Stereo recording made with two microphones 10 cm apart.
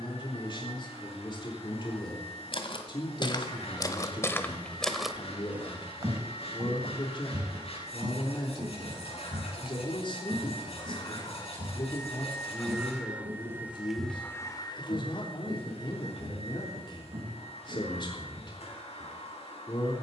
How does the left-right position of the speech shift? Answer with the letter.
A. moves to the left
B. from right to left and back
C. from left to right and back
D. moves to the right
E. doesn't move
E.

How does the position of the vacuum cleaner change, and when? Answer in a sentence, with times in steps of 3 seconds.
In this clip you hear the vacuum cleaner on the left from 0 s, in the centre from 12 s and on the left from 15 s.